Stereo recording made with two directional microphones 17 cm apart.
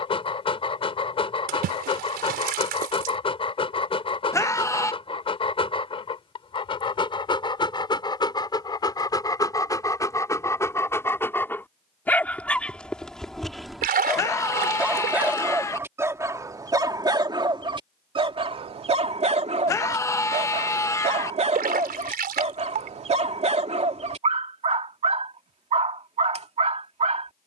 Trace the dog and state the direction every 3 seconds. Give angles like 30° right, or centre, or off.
30° left, 30° left, 30° left, 20° left, centre, 20° right, 40° right, 40° right, 40° right.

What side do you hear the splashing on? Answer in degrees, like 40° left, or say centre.
60° right.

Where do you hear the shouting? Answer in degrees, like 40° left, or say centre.
20° left.